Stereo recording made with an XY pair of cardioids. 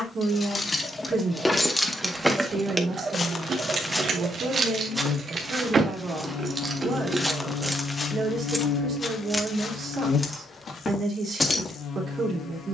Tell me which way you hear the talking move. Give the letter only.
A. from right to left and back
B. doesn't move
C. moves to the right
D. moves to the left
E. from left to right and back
B.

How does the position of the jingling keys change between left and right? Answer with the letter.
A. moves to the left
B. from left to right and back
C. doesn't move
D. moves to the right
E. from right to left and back
B.